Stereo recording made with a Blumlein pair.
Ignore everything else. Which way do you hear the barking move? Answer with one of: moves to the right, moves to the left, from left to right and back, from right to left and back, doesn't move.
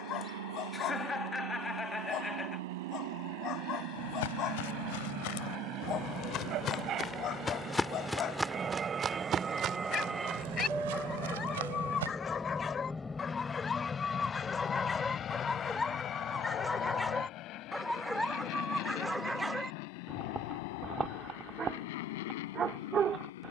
moves to the right.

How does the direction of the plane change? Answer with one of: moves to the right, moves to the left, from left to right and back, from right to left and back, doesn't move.
moves to the left.